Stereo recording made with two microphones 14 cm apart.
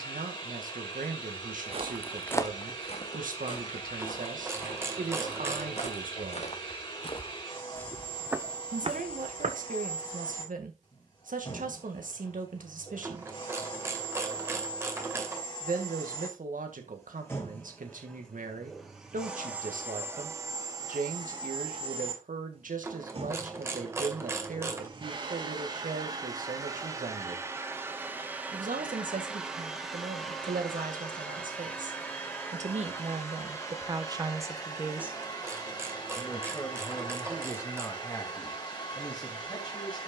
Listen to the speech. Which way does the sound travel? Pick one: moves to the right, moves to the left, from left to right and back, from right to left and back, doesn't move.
moves to the left.